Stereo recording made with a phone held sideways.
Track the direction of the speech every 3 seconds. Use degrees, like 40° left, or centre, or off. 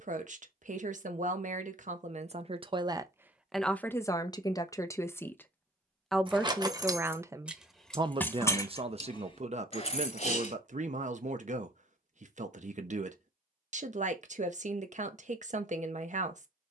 50° right, 20° left, 20° right, 50° right, 60° right, 60° right.